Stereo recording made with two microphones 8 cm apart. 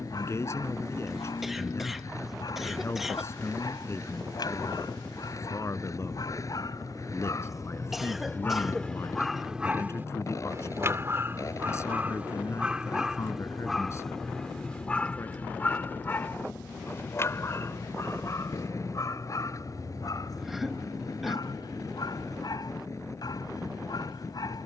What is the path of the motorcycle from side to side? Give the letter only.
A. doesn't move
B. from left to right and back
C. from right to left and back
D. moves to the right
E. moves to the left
A.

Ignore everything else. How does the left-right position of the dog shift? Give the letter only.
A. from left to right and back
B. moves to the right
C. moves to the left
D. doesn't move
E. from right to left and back
A.